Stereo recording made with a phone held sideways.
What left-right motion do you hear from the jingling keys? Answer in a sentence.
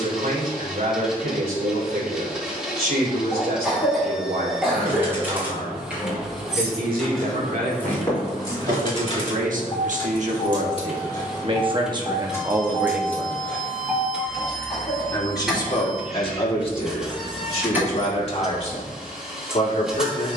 You can hear the jingling keys go left and come back.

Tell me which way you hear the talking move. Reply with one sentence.
You can hear the talking go from the right side to the left.